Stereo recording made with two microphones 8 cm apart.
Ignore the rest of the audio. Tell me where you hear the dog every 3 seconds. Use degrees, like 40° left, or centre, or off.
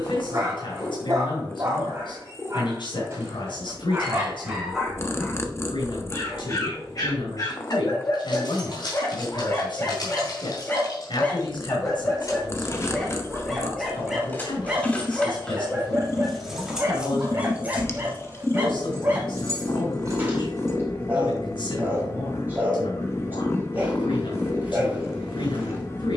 30° right, 10° right, 40° left, 30° left, centre, 20° right, 20° right, 20° right, 20° right.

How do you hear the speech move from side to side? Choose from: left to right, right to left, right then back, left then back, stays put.
stays put.